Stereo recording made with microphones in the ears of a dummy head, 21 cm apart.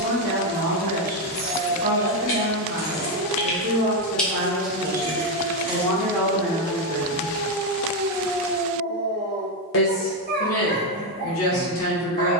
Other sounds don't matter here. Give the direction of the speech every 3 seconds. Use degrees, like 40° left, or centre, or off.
30° right, 20° right, 20° left, 60° left.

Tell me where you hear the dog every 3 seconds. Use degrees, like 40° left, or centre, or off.
60° right, 30° right, 10° right, 40° right.